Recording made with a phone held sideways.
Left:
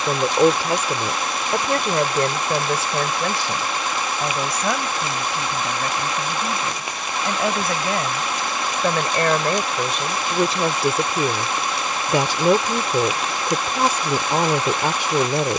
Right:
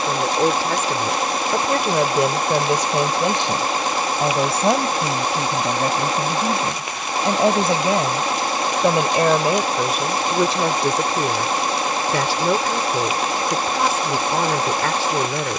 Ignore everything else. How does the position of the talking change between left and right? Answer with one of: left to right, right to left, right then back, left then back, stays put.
right then back.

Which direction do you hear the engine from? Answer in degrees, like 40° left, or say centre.
40° right.